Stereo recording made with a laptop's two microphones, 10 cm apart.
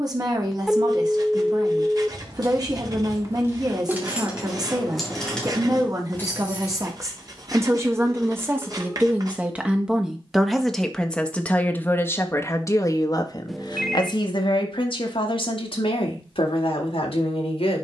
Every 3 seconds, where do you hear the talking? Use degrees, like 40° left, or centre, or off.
40° right, 40° right, 30° right, centre, 40° left, 70° left.